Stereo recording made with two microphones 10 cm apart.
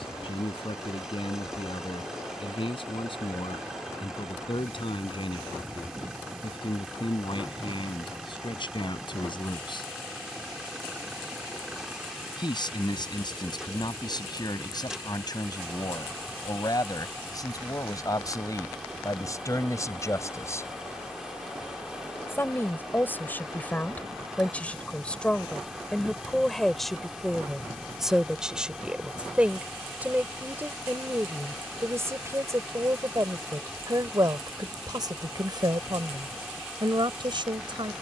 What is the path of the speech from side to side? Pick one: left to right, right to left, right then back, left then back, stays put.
left to right.